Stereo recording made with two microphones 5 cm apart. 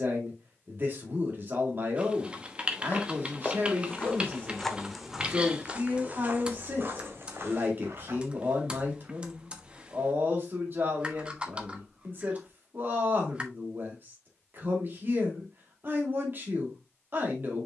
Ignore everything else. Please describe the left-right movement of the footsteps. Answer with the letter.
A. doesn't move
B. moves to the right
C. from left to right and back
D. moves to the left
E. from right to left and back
B.